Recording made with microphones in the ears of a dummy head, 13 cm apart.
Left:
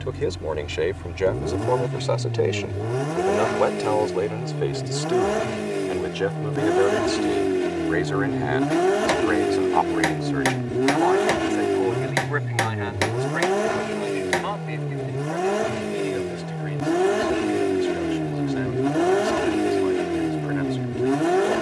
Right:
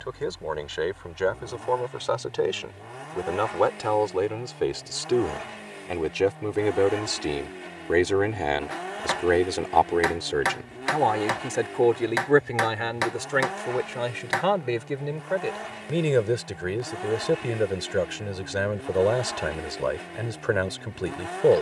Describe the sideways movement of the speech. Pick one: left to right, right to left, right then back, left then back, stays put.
left to right.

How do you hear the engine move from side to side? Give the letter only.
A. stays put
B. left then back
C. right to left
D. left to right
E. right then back
A.